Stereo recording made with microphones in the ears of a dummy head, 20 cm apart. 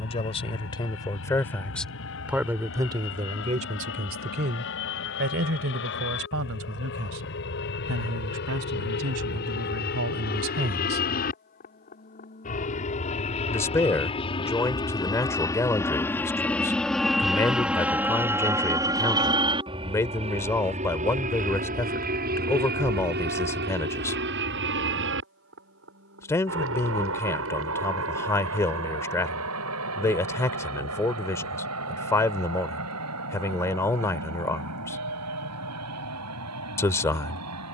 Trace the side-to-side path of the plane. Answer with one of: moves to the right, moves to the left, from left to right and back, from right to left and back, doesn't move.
moves to the right.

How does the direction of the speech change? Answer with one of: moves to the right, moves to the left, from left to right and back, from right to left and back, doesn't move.
from left to right and back.